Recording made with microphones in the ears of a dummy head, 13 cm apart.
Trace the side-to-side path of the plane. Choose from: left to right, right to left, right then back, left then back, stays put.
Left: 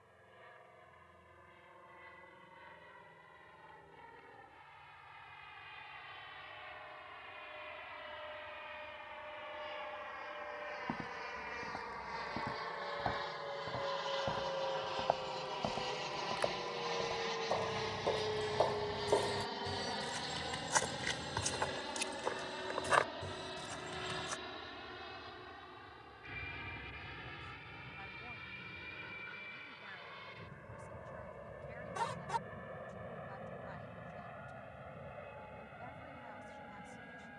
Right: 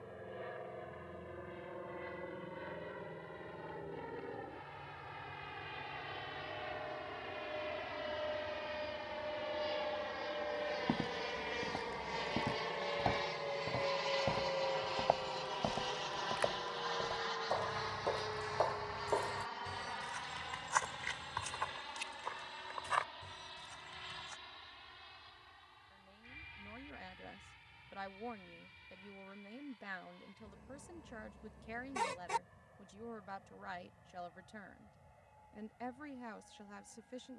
right to left.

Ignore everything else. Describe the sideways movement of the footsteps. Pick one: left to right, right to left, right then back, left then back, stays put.
right to left.